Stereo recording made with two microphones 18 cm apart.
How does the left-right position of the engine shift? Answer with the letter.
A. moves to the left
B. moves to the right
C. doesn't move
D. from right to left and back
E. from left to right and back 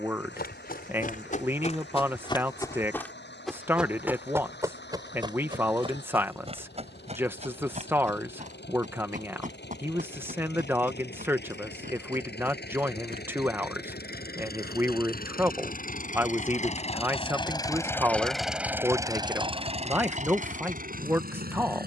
B.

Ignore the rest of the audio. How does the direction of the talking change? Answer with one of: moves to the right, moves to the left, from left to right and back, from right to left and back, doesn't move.
doesn't move.